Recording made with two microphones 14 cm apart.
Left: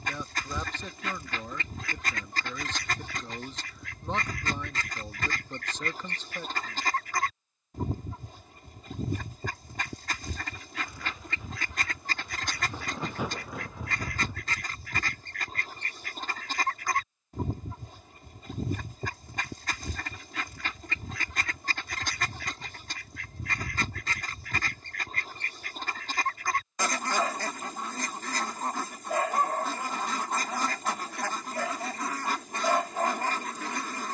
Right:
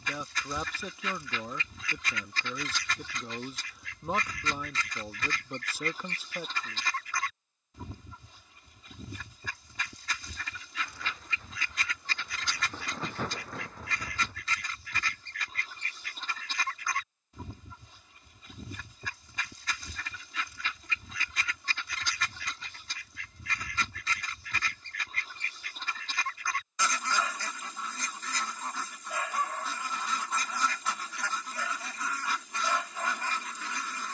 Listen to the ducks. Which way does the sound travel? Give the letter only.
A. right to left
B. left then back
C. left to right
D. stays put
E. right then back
D.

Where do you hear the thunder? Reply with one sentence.
In this clip you hear the thunder in the centre.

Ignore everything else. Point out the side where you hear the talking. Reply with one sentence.
In this clip you hear the talking in the centre.